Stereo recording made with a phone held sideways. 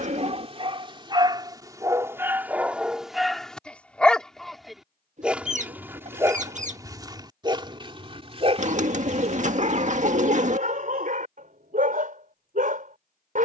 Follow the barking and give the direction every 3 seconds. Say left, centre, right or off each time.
right, centre, right, right, right.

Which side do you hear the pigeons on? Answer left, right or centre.
right.